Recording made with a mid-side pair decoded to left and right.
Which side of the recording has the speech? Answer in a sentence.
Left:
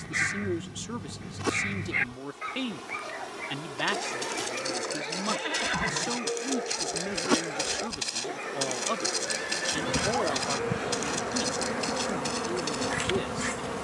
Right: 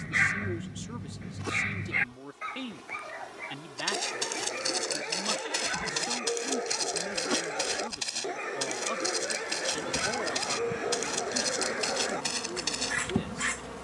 You can hear the speech on the left.